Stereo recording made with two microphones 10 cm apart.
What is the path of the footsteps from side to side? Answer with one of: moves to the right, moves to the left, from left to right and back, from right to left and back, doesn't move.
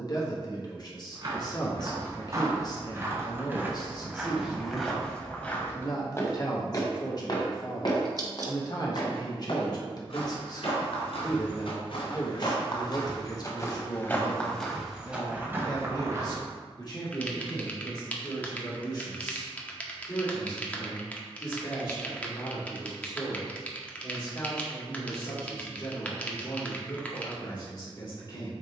from right to left and back.